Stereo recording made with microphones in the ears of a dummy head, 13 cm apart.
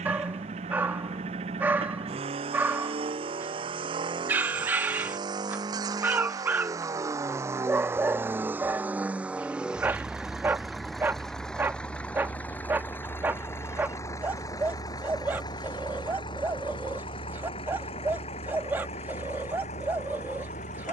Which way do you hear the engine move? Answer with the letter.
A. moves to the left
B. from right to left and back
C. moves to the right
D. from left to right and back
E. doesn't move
A.